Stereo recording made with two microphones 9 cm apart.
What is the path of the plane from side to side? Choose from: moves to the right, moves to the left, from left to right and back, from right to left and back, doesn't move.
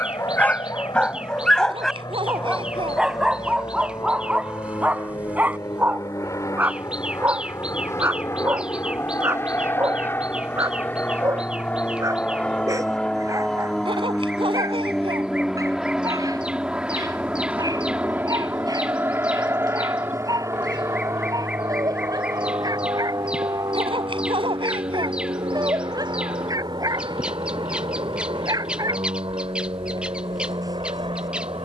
moves to the right.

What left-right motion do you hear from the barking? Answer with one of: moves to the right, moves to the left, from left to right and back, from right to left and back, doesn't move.
moves to the right.